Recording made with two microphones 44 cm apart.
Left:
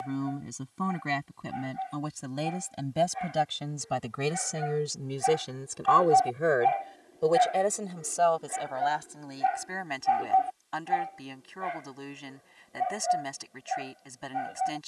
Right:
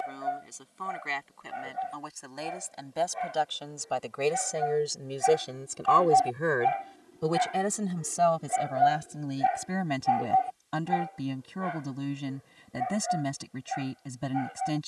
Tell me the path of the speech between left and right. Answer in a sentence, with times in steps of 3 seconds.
In this clip you hear the speech on the left from 0 s and on the right from 6 s.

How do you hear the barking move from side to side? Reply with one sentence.
In this clip you hear the barking move from right to left.